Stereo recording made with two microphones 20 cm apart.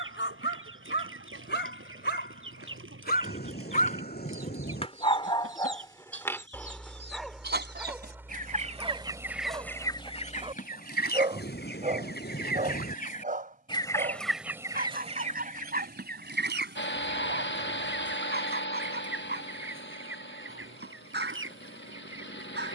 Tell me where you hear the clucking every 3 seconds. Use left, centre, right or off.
right, right, right, left, left, right, right, right.